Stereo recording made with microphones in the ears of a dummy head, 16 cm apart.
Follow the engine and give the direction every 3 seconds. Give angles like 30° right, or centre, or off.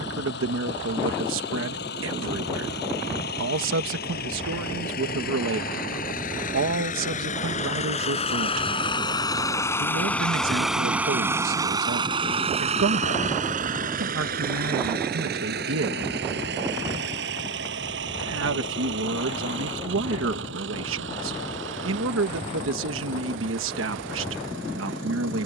70° left, 60° left, 40° left, centre, 50° right, 70° right, 80° right, 80° right, 80° right.